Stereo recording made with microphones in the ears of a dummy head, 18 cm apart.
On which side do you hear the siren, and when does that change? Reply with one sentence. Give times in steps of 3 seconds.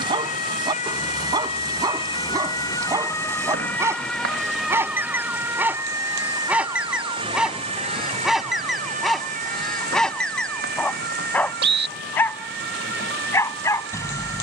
In this clip you hear the siren on the left from 0 s, in the centre from 3 s and on the right from 6 s.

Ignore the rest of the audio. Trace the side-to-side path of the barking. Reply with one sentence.
You can hear the barking go from the right side to the left.